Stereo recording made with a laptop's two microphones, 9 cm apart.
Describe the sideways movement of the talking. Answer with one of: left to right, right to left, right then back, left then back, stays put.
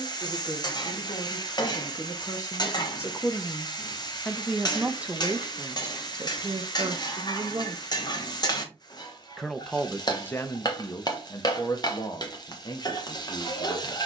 right then back.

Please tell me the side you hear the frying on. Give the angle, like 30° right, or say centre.
50° left.